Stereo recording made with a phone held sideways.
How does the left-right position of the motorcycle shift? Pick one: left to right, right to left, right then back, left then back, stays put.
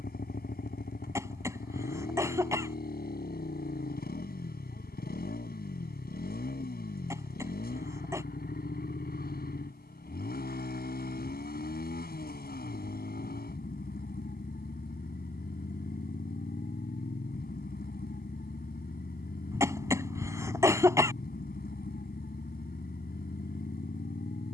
stays put.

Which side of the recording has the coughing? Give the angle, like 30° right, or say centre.
20° right.